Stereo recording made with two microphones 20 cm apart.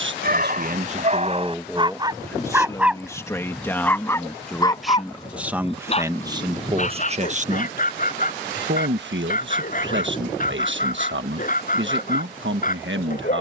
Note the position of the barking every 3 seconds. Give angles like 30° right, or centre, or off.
30° right, 20° left, 40° left, 40° left, 40° left.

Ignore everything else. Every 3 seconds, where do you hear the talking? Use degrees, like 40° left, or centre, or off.
20° right, centre, 40° right, 70° right, 70° right.